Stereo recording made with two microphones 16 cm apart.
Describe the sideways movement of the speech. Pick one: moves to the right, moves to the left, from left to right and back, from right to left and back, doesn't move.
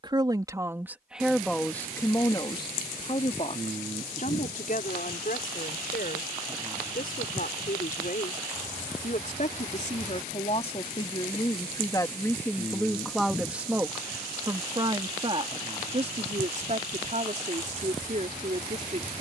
from right to left and back.